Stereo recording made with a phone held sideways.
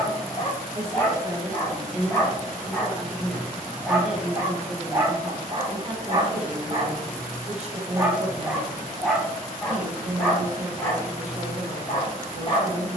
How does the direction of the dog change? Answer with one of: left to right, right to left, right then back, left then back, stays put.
right then back.